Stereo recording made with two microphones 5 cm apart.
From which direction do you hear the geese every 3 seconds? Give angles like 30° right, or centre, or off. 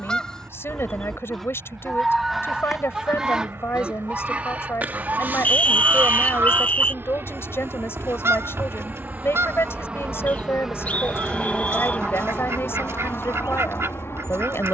centre, 30° right, 60° right, 70° right, 70° right.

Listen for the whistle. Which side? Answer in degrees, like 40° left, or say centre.
30° left.